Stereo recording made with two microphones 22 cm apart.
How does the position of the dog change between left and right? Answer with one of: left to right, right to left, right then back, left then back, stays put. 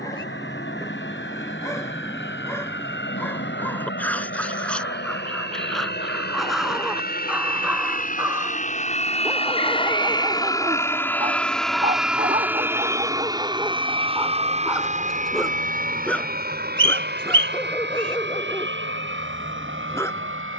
right then back.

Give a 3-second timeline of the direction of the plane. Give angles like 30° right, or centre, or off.
70° left, 60° left, 50° left, 20° left, 20° right, 40° right, 50° right.